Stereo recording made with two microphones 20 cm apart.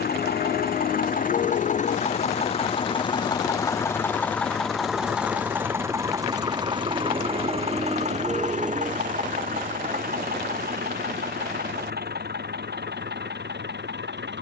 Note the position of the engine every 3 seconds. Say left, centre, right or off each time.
left, centre, right, right, right.